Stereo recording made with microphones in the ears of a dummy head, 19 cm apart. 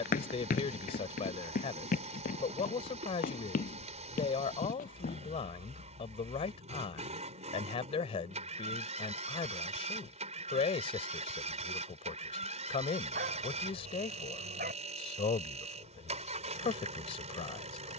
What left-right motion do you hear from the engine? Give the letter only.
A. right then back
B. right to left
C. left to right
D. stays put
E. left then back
D.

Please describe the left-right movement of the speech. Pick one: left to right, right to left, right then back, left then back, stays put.
stays put.